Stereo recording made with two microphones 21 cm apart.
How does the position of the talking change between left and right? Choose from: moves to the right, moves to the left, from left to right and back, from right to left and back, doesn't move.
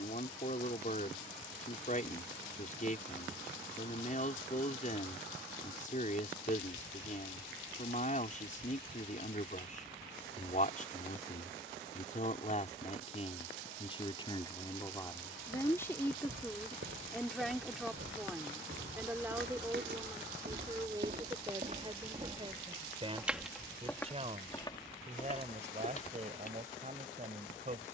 moves to the right.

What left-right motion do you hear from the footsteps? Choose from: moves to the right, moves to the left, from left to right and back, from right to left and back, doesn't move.
moves to the left.